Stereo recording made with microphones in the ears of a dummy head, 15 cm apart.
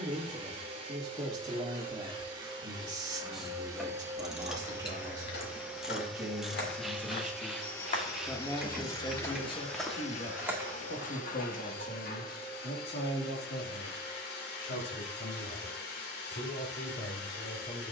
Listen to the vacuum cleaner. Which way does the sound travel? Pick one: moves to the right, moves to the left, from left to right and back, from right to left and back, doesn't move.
moves to the left.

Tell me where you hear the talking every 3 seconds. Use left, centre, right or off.
right, right, centre, left, left, left.